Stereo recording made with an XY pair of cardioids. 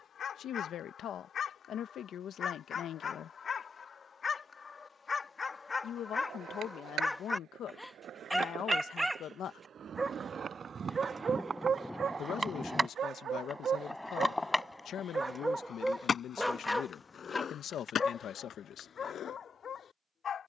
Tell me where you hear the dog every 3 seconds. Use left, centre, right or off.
left, left, centre, right, right, centre, left.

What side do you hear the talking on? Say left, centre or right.
left.